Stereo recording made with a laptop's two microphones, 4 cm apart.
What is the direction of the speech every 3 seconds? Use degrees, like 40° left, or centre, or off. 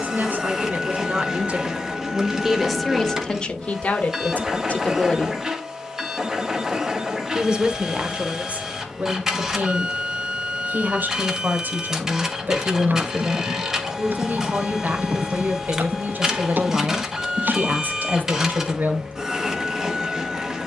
30° right, 30° left, 30° right, 50° right, 50° right, 50° right, 50° right.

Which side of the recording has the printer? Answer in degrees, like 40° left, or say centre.
10° right.